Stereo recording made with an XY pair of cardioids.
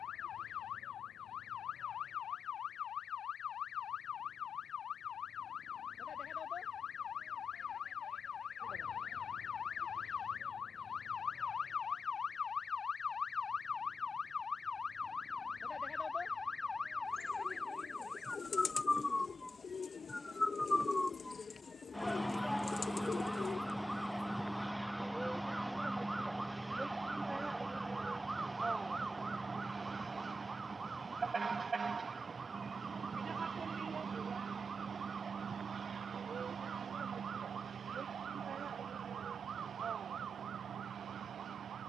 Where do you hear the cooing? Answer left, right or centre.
left.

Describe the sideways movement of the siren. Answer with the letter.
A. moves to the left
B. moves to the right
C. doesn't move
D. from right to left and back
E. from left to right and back
B.